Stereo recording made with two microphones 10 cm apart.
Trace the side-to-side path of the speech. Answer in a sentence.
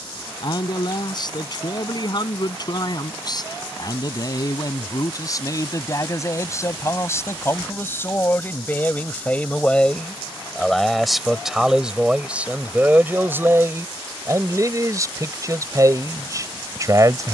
You can hear the speech move to the right.